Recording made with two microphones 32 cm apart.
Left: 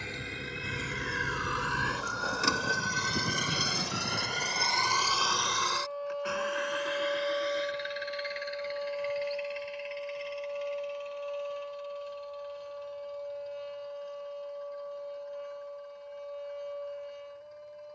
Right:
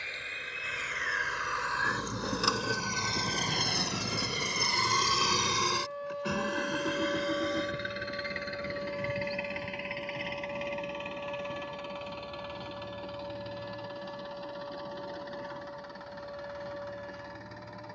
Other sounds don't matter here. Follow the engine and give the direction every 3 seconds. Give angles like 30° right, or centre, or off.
40° left, 10° right, 60° right, 70° right, 80° right, 80° right.